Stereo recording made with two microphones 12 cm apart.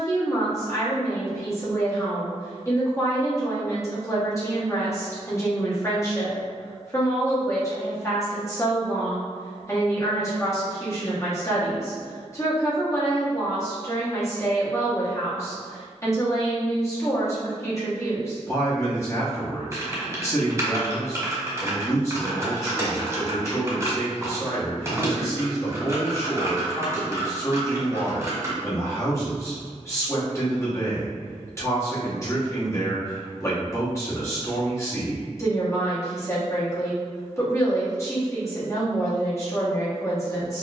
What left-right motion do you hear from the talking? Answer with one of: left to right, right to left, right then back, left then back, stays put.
stays put.